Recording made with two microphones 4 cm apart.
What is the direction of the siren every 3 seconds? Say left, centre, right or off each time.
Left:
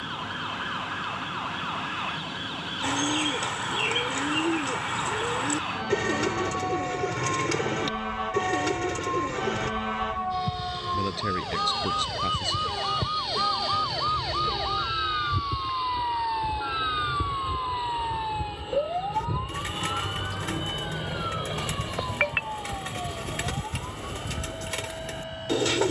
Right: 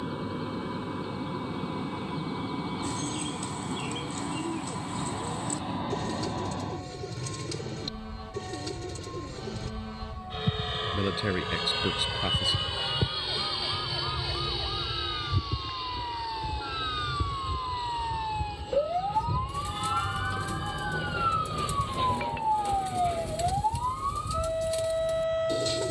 left, left, left, left, left, left, centre, right, right.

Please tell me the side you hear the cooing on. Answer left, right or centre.
left.